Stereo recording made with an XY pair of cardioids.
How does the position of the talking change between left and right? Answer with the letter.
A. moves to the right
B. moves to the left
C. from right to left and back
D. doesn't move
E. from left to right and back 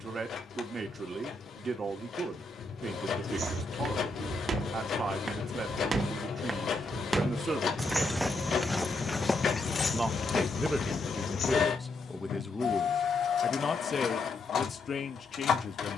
B.